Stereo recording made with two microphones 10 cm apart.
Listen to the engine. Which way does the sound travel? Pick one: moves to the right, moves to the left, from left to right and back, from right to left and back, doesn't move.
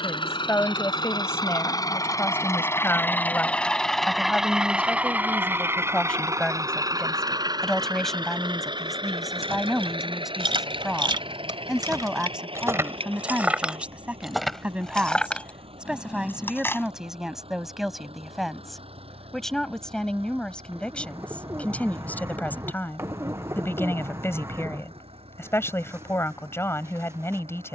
moves to the right.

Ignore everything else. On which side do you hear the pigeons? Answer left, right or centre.
right.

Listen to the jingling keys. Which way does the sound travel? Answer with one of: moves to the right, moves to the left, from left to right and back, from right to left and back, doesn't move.
moves to the left.